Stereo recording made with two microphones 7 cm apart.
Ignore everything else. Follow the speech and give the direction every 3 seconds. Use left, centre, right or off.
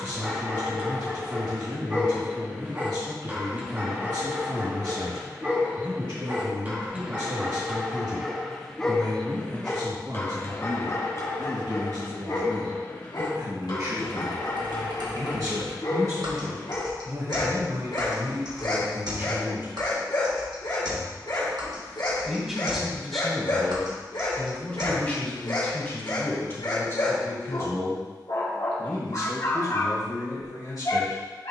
right, right, right, right, right, right, right, centre, left, left, left.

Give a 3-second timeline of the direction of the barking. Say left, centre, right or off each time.
right, right, centre, left, left, left, left, left, left, left, left.